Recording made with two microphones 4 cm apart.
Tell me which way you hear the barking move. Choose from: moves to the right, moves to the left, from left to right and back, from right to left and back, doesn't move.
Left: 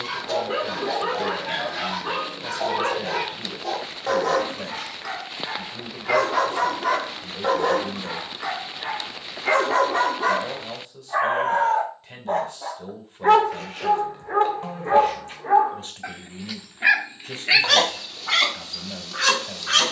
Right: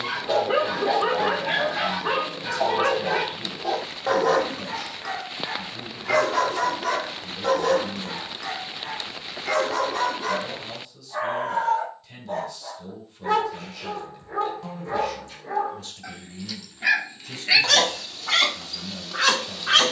from right to left and back.